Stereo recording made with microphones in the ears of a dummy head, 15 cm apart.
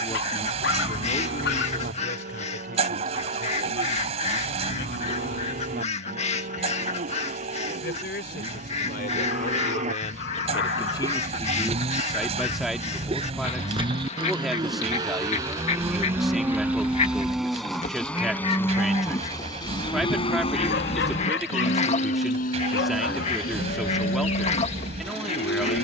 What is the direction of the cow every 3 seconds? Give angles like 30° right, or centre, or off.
60° right, 60° right, 50° right, 50° right, 30° right, 10° right, 20° left, 60° left, 70° left.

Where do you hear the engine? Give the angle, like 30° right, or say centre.
40° right.